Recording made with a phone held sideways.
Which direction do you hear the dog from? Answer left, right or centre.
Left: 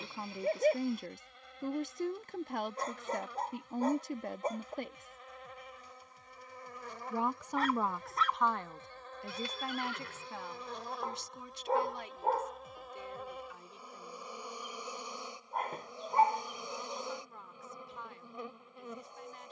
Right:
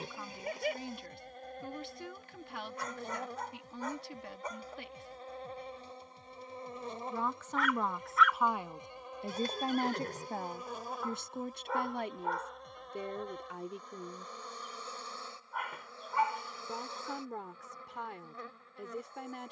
left.